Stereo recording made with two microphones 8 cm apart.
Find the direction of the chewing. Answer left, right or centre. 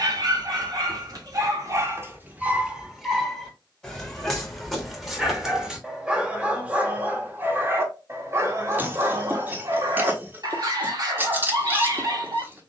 right.